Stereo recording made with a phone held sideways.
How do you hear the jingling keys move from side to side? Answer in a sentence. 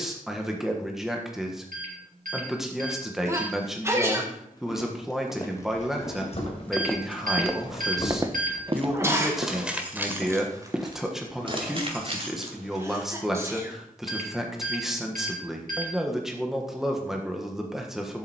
You can hear the jingling keys travel towards the right.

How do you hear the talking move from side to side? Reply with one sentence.
In this clip you hear the talking stay in one place.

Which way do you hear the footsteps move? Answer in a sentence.
In this clip you hear the footsteps go right and come back.